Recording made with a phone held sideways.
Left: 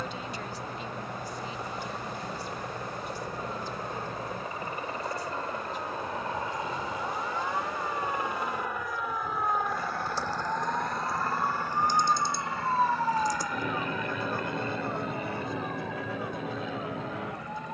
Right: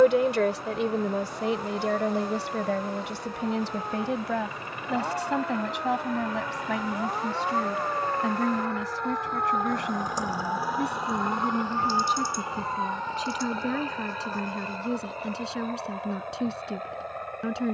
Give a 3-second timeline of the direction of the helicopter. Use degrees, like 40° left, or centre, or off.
50° left, 40° left, 20° left, 10° right, 30° right, 50° right.